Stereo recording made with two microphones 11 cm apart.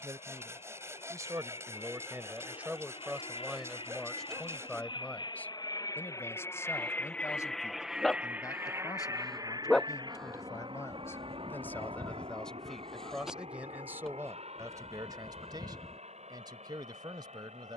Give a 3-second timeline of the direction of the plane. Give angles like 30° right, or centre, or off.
70° left, 50° left, centre, 40° right, 60° right, 70° right.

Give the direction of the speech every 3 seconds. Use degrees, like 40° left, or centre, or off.
20° right, centre, 30° left, 30° left, 10° right, 40° right.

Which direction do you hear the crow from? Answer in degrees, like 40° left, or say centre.
centre.